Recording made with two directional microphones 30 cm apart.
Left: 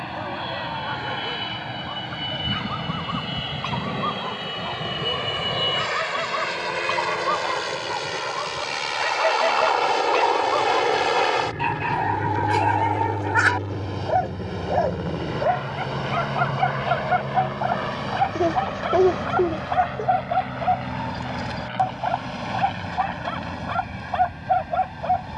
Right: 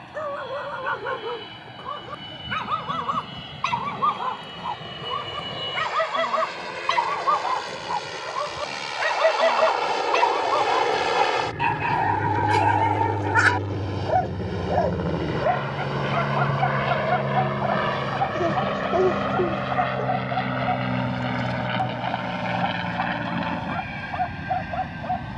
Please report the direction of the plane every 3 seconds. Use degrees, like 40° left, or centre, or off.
60° left, 50° left, 40° left, 10° left, 10° right, 30° right, 40° right, 50° right, 60° right.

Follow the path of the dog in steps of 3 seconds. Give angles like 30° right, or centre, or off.
50° right, 40° right, 40° right, 20° right, 10° right, 10° left, 30° left, 30° left, 30° left.